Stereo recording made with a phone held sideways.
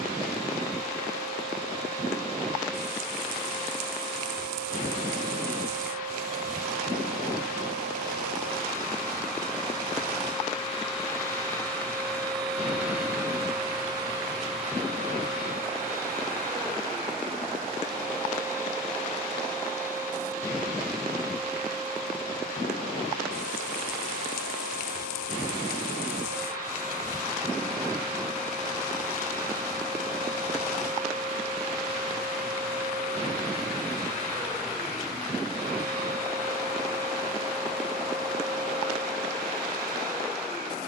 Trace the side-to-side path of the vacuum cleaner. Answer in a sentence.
You can hear the vacuum cleaner go from the left side to the right.